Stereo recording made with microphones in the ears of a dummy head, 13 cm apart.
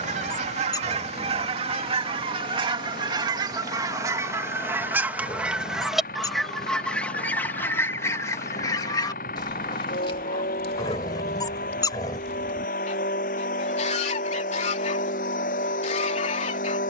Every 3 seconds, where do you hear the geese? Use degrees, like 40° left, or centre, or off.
40° right, 20° right, 10° left, 40° left, 50° left, 50° left.